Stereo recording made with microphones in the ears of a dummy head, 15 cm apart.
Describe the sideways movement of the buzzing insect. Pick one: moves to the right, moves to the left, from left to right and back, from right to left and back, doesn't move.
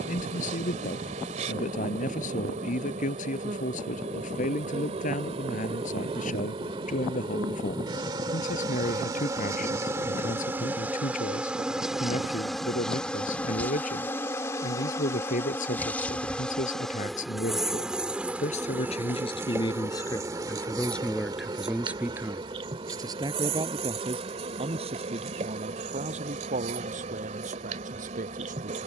from right to left and back.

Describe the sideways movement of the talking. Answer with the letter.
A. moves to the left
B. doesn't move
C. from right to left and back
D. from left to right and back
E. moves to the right
E.